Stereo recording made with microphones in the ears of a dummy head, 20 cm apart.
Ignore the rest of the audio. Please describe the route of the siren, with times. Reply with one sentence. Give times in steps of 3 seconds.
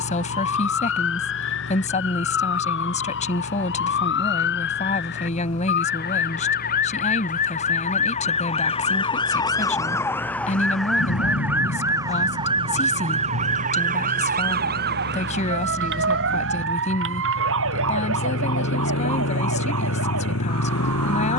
In this clip you hear the siren on the left from 0 s, in the centre from 9 s and on the right from 12 s.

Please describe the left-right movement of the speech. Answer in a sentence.
You can hear the speech stay put.